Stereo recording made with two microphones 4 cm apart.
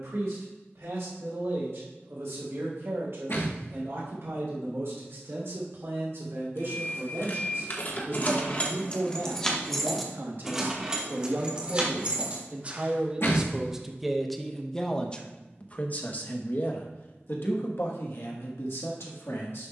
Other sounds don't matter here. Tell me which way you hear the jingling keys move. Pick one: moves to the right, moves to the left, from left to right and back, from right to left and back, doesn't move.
moves to the right.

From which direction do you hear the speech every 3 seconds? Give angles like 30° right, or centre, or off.
70° right, 70° right, 70° right, 50° right, 10° right, 50° left, 70° left.